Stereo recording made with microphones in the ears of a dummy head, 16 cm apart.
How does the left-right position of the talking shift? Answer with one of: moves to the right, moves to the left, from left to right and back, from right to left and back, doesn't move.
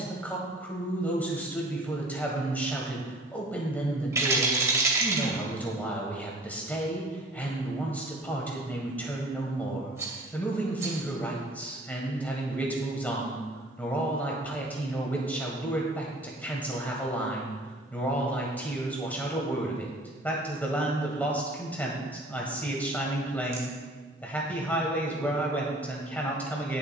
doesn't move.